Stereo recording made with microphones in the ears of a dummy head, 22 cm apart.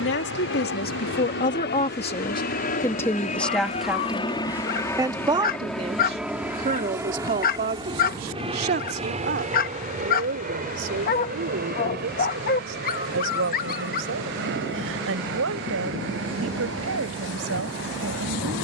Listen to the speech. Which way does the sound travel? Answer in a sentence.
In this clip you hear the speech move from left to right.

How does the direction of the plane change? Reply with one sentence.
In this clip you hear the plane move to the right.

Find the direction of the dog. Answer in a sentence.
You can hear the dog on the left.